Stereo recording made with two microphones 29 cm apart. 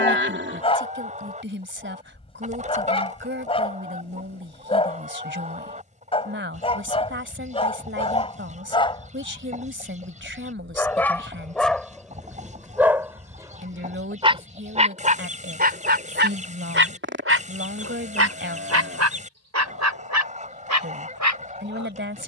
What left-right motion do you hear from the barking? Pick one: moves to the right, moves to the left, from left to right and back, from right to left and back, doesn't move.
moves to the right.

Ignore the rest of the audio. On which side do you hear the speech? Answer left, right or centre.
right.